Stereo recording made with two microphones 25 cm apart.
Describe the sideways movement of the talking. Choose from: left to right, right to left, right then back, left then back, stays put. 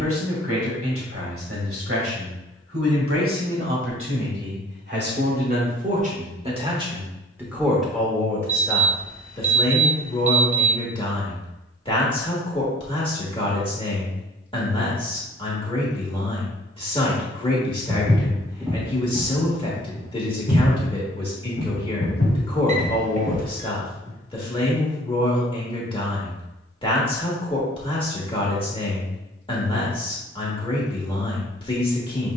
right to left.